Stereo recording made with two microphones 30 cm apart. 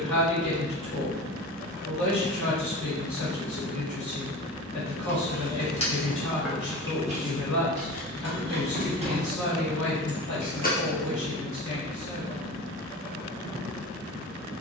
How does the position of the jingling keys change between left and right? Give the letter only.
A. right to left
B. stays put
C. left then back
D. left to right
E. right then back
E.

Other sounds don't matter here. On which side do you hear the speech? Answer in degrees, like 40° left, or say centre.
70° left.